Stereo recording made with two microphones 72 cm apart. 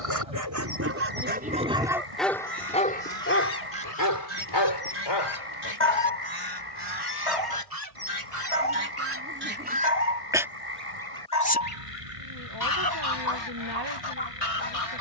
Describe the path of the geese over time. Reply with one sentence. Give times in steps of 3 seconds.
In this clip you hear the geese on the right from 0 s, in the centre from 9 s and on the left from 12 s.